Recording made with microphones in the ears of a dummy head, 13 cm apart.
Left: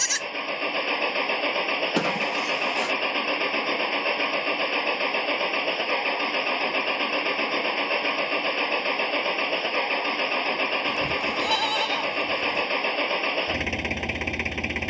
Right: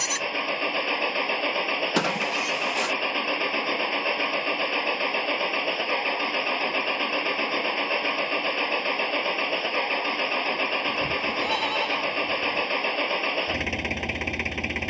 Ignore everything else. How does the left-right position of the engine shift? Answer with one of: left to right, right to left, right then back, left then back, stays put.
stays put.